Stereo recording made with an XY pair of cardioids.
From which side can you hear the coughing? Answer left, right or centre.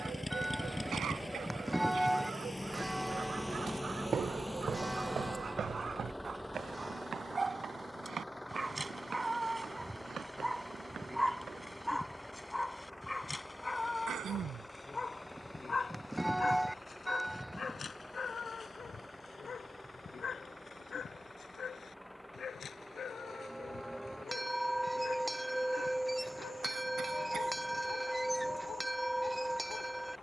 right.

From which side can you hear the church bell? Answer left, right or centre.
centre.